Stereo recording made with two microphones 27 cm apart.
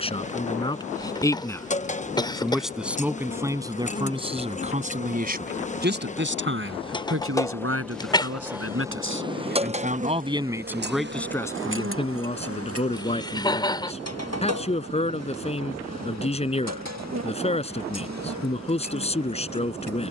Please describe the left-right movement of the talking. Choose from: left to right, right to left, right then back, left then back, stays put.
right then back.